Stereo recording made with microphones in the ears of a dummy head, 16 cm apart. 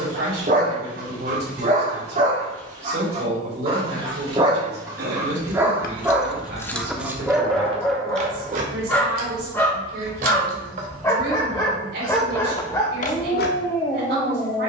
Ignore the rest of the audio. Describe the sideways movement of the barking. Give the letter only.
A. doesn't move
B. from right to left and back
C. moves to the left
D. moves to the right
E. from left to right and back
C.